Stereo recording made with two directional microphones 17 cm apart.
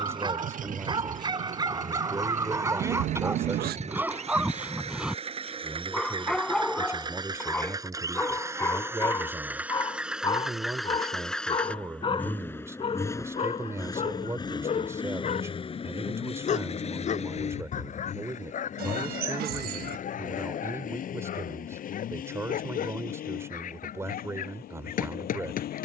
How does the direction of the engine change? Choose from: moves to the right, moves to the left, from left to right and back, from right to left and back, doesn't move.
moves to the left.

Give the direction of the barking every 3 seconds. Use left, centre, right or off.
right, centre, centre, left, left, left, left, left, left.